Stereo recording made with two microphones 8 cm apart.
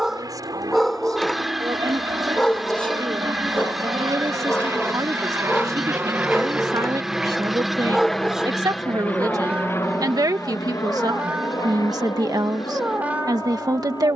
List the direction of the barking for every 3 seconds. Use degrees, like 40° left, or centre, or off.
10° left, 20° left, centre, 20° right, 20° right.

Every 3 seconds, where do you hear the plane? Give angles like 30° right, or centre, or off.
60° right, 50° right, centre, 40° left, 60° left.